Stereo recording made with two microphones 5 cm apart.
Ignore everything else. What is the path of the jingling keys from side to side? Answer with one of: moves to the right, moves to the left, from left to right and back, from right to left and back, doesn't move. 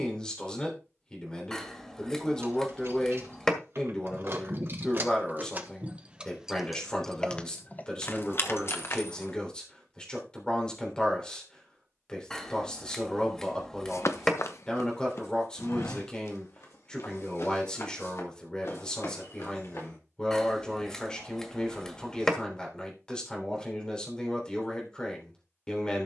moves to the left.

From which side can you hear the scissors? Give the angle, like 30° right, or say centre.
10° left.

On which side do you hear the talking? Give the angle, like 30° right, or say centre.
20° left.